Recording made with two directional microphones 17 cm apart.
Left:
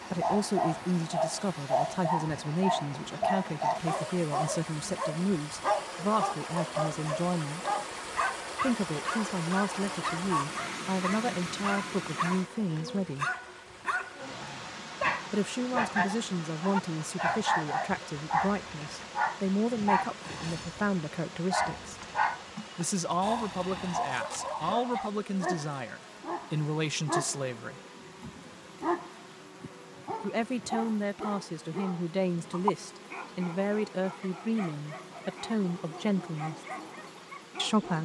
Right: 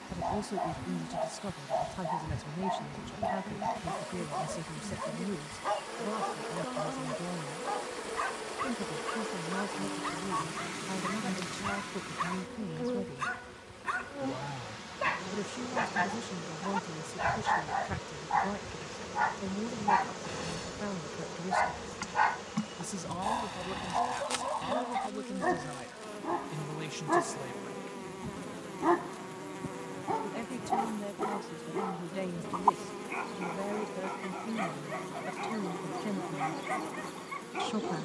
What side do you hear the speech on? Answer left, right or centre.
left.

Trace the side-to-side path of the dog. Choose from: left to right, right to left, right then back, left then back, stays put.
left to right.